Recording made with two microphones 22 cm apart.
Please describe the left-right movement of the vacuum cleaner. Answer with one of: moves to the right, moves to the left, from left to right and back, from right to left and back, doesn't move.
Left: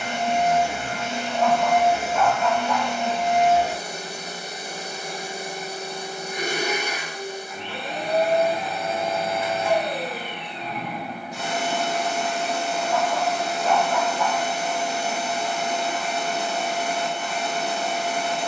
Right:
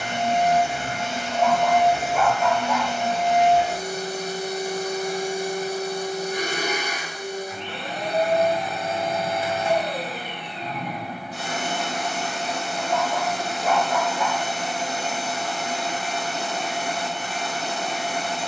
doesn't move.